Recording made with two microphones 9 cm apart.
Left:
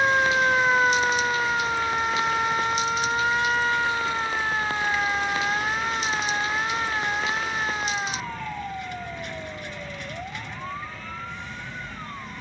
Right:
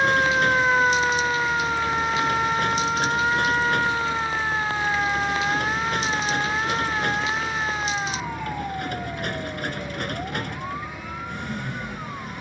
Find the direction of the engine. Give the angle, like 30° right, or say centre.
70° right.